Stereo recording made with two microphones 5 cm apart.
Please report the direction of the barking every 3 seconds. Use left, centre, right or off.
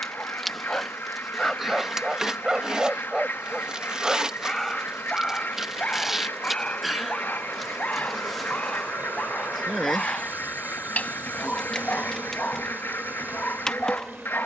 centre, centre, left, left, left.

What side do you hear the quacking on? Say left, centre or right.
left.